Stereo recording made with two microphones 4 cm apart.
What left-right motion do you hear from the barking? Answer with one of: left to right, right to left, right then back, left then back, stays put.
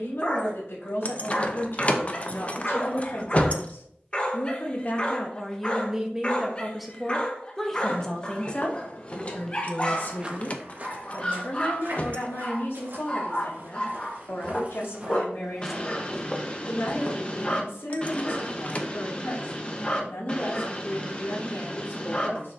stays put.